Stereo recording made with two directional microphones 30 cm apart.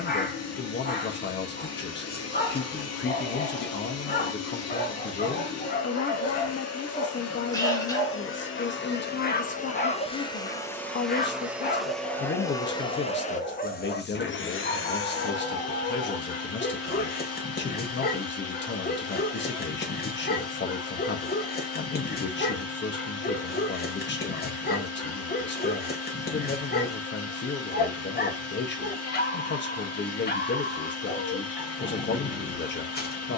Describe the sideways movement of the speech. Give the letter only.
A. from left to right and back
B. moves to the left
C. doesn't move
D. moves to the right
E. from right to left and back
C.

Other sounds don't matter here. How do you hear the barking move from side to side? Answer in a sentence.
In this clip you hear the barking stay put.